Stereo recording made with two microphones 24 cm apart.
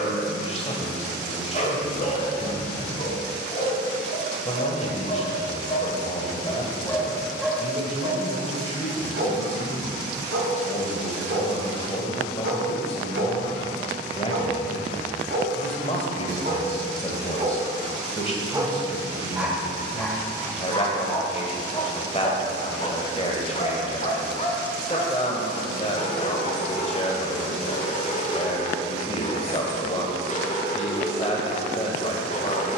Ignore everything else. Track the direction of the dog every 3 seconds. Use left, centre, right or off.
left, left, centre, right, right, right, centre, left, left, left, left.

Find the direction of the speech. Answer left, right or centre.
left.